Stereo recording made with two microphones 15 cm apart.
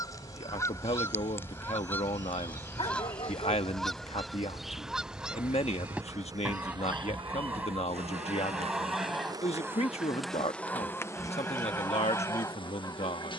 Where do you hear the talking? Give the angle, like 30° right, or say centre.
50° left.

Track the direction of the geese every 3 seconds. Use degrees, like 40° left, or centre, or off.
10° left, centre, 10° right, 10° left, 20° left.